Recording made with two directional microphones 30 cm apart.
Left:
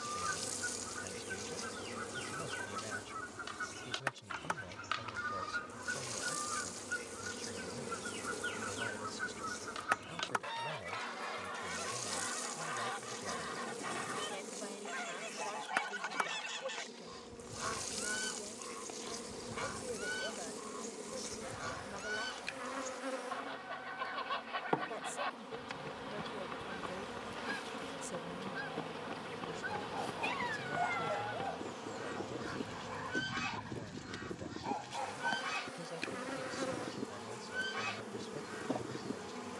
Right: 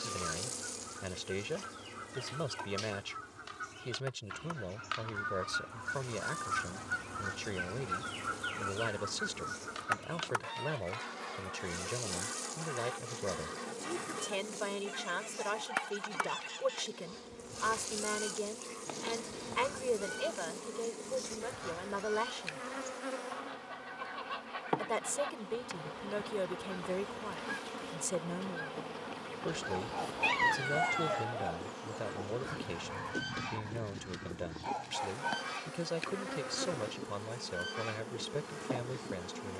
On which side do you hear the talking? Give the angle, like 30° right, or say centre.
70° right.